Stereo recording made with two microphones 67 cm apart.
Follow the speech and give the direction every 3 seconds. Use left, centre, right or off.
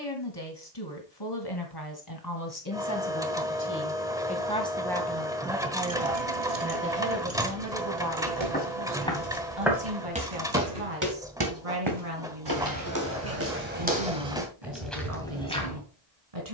left, centre, right, right, right, right.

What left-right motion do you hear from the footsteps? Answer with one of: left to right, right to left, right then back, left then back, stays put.
right then back.